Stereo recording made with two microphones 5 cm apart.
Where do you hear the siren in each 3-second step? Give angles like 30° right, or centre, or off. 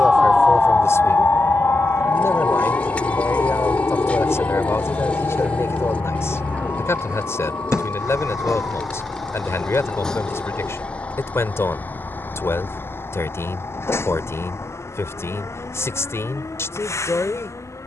40° left, 70° left, 70° left, 70° left, 80° left, 80° left.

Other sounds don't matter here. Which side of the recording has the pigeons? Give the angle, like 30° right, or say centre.
30° left.